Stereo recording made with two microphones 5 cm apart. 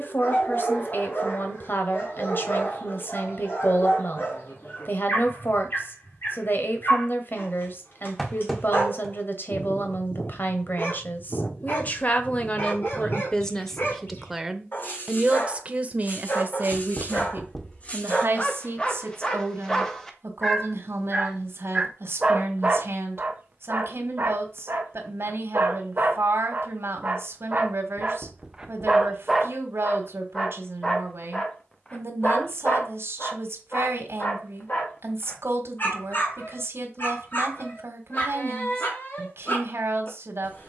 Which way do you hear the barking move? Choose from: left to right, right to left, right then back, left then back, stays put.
right then back.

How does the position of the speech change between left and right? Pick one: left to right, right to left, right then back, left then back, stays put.
left to right.